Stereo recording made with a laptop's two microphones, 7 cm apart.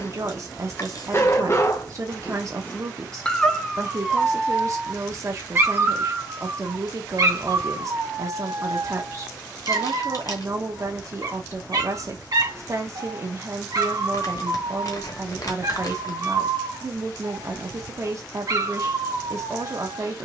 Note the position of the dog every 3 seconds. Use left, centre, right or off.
left, centre, right, right, right, right, right.